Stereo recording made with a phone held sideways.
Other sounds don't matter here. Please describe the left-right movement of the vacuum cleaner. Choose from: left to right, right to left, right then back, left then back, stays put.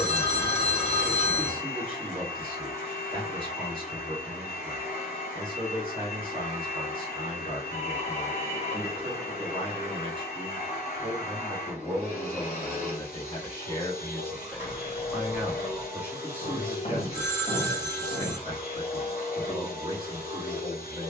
stays put.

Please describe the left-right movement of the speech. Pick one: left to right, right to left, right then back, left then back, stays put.
left then back.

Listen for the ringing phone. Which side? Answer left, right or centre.
left.